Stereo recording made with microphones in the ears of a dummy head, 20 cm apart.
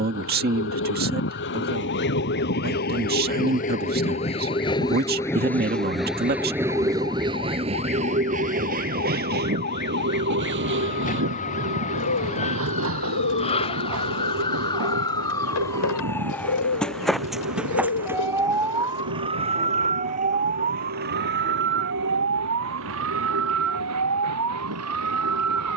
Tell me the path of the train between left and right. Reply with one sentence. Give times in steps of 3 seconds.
You can hear the train on the left from 0 s and on the right from 6 s.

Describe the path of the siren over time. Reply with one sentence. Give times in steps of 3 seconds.
In this clip you hear the siren on the left from 0 s, in the centre from 15 s and on the right from 18 s.